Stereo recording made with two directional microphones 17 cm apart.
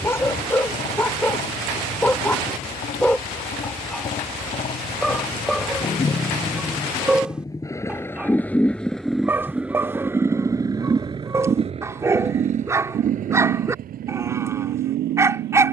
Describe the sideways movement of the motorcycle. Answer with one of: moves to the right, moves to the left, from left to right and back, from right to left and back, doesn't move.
moves to the right.